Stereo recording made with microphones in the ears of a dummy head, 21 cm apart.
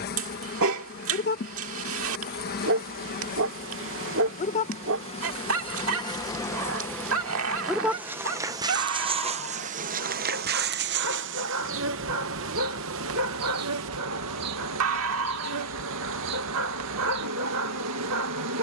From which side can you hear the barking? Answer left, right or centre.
right.